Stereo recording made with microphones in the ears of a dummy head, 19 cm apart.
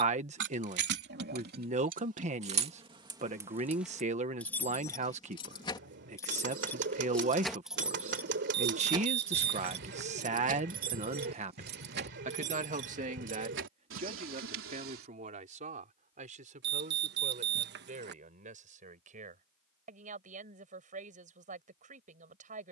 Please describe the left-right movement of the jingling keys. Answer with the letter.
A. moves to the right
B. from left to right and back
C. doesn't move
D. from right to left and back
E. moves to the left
D.